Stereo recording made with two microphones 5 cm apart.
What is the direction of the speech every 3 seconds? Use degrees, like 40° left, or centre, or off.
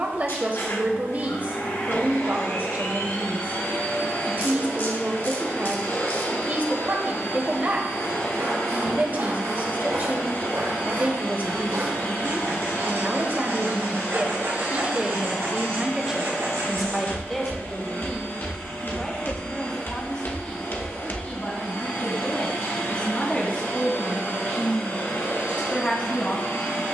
40° right, 40° right, 40° right, 40° right, 40° right, 10° right, 20° left, 30° left, 30° left.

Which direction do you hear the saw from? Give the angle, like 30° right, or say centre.
70° right.